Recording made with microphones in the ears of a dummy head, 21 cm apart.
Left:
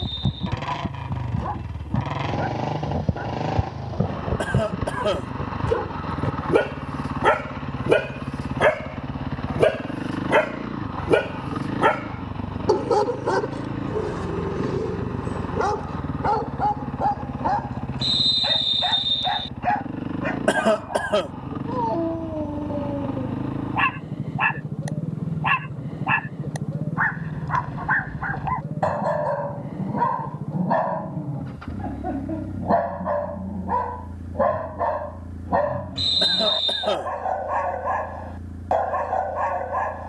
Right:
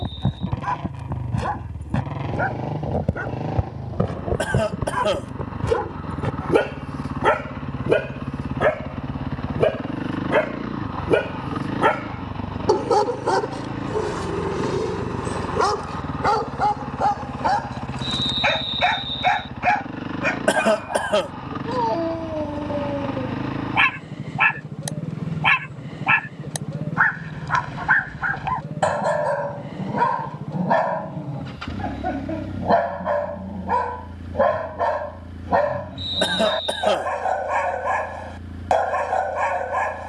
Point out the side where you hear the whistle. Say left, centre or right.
left.